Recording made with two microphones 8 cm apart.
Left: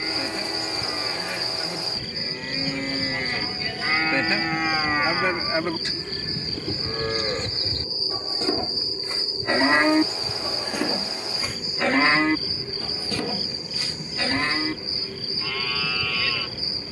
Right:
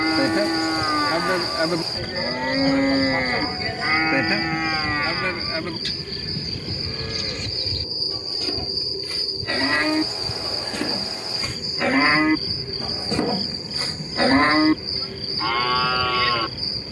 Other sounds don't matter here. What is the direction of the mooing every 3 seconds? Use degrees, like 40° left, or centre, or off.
60° right, 10° right, 30° left, 10° left, 30° right, 60° right.